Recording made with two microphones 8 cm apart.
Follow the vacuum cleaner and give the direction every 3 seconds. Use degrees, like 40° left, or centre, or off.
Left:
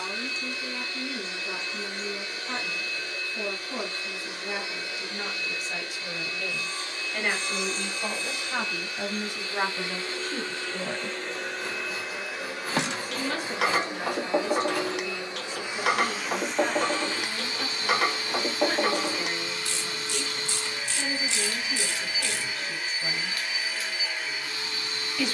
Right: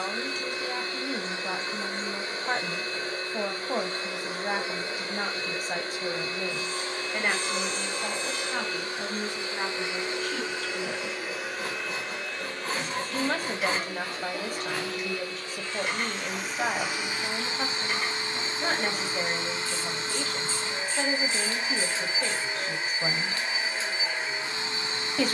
30° right, 30° right, 30° right, 10° right, 20° left, centre, 30° right, 30° right, 30° right.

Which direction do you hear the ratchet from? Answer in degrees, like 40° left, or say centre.
70° left.